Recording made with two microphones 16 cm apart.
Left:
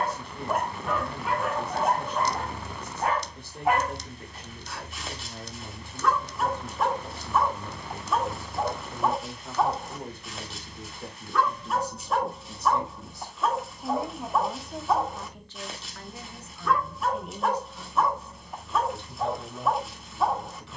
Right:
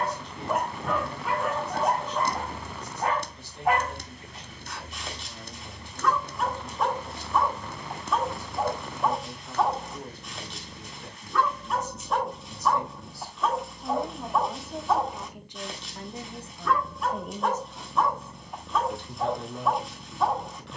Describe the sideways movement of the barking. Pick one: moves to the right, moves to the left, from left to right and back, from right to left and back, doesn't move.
doesn't move.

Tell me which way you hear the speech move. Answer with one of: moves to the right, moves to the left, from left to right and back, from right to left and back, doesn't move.
moves to the right.